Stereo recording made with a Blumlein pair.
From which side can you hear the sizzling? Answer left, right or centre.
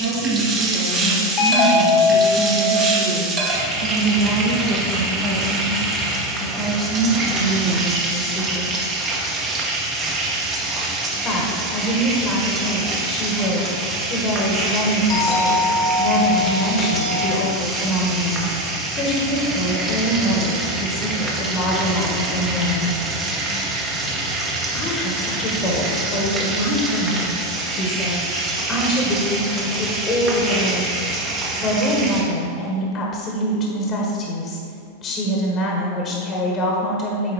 right.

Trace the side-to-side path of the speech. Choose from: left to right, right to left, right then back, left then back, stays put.
right to left.